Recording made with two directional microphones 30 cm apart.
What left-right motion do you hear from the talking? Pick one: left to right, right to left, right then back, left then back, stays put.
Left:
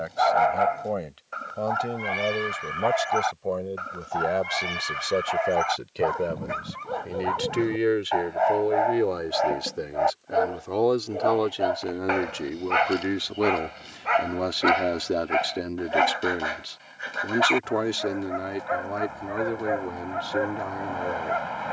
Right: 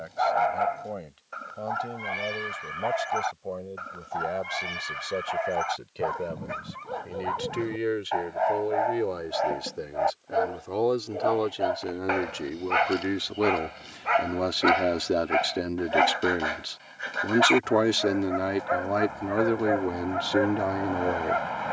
left to right.